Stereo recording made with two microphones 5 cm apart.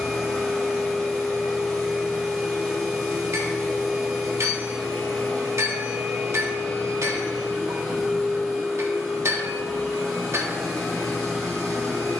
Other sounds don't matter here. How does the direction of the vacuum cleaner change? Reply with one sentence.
You can hear the vacuum cleaner stay in one place.